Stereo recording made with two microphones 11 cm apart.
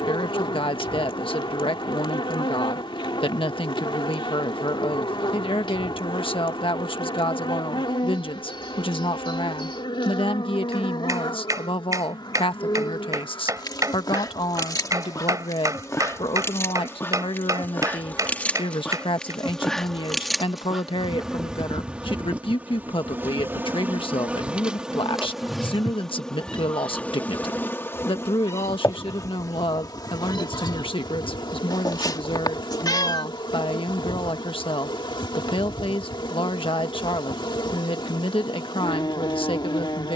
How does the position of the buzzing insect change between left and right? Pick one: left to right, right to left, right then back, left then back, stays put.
right then back.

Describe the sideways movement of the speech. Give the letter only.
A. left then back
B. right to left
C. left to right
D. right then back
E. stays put
E.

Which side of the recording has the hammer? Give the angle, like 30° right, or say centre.
30° right.